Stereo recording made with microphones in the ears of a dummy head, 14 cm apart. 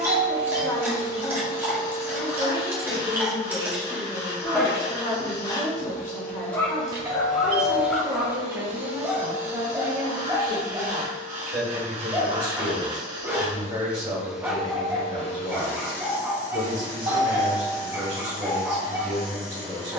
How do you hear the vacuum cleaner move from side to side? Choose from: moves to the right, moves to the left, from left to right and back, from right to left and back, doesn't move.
from left to right and back.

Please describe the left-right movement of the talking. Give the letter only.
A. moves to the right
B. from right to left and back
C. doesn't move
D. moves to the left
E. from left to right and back
A.